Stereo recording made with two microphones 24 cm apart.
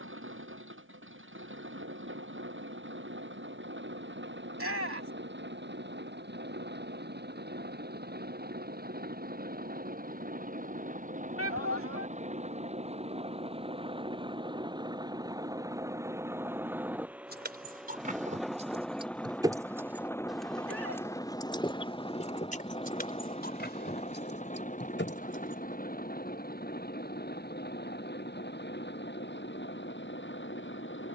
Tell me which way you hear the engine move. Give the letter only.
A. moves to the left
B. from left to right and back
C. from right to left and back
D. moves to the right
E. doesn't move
A.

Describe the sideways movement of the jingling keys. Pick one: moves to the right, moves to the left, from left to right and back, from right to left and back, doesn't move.
moves to the left.